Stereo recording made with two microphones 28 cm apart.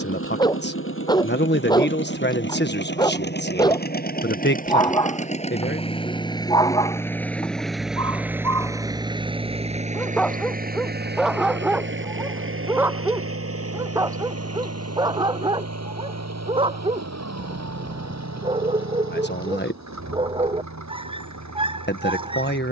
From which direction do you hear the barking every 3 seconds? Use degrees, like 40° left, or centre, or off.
10° left, 10° left, 10° left, centre, 10° right, 20° right, 20° right, 20° right.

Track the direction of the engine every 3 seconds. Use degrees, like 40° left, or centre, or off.
50° left, 30° left, centre, 30° right, 50° right, 70° right, 70° right, 80° right.